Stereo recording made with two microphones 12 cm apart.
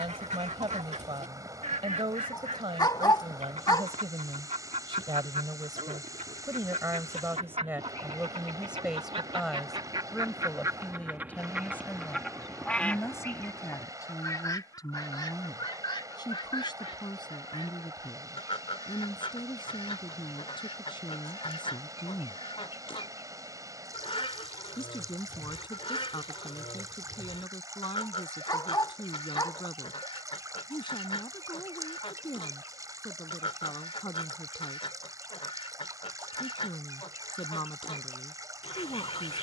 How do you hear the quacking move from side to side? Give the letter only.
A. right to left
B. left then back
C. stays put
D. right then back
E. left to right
A.